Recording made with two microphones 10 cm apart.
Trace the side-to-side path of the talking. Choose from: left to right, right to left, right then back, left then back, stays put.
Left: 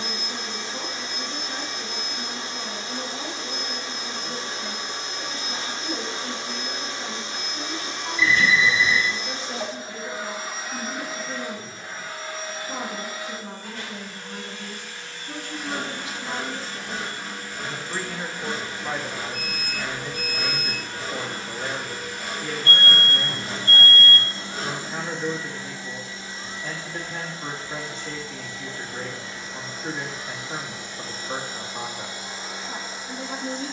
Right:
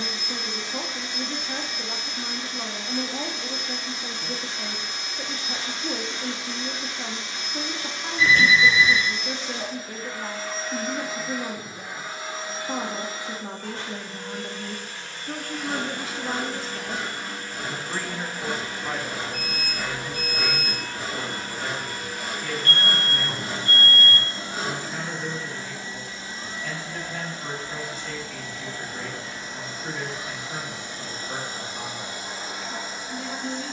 right to left.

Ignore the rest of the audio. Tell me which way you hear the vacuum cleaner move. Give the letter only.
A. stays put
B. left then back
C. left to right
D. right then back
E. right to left
C.